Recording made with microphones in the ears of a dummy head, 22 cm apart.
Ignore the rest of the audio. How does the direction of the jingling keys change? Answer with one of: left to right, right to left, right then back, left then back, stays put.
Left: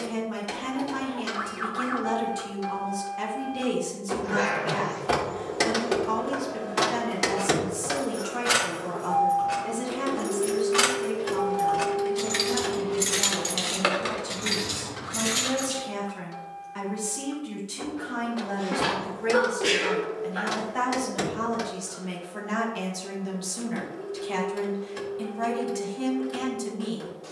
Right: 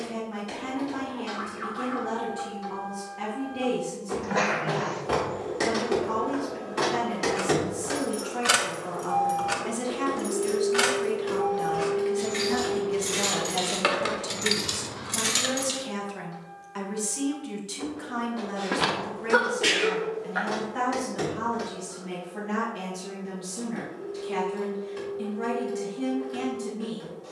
left then back.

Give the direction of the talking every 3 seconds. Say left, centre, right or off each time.
left, left, left, right, right, right, centre, left, left.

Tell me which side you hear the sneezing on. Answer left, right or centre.
right.